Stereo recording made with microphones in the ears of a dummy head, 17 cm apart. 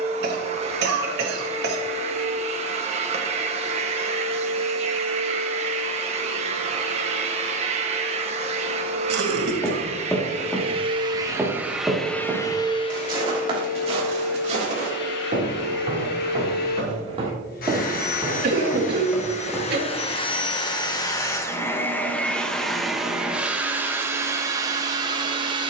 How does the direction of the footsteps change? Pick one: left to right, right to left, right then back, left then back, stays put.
right then back.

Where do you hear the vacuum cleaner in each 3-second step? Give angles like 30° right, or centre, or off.
30° right, 30° right, 30° right, 30° right, 40° left, 60° left, 30° left, centre, 20° right.